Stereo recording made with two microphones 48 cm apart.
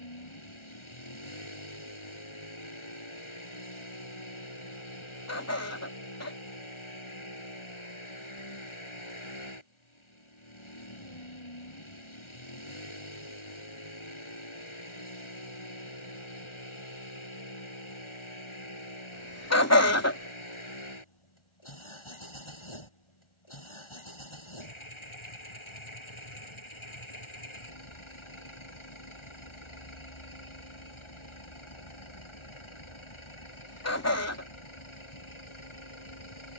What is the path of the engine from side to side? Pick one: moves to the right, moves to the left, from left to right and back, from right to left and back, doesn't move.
doesn't move.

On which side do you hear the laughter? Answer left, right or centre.
left.